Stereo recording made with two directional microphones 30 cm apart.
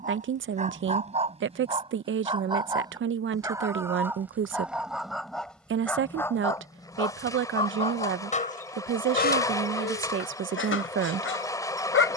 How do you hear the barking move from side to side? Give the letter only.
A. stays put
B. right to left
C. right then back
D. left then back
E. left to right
B.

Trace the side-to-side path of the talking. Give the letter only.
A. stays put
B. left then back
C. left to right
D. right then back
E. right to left
A.